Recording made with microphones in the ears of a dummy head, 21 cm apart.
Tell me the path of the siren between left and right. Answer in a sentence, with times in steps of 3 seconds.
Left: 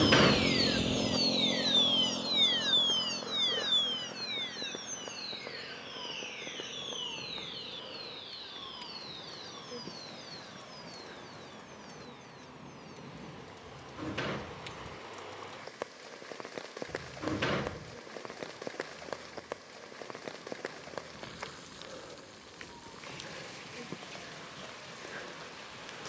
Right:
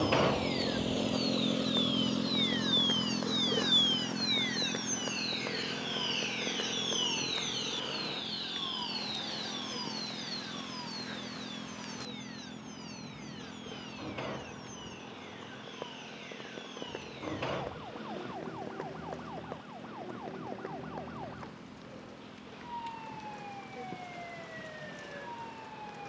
In this clip you hear the siren on the left from 0 s and on the right from 3 s.